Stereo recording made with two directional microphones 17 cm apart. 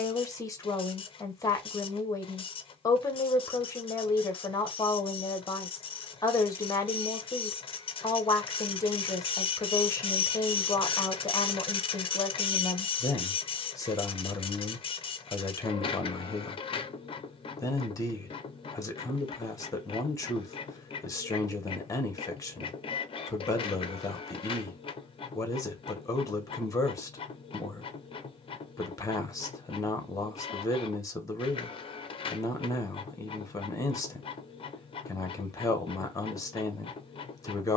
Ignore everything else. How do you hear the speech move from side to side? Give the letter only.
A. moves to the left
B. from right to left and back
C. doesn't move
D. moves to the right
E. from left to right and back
C.